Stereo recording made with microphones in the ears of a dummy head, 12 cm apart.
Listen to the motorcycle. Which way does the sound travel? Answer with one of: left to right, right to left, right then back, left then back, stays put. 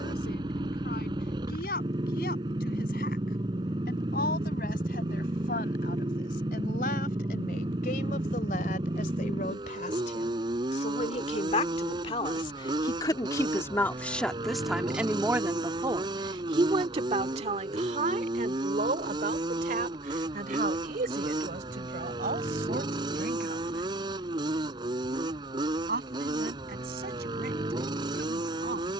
stays put.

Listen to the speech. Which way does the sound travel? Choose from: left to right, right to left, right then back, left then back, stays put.
left to right.